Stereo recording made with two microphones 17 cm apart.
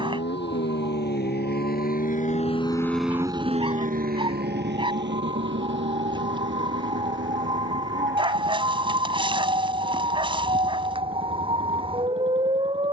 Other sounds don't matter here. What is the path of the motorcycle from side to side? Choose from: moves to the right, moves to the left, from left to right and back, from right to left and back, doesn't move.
moves to the right.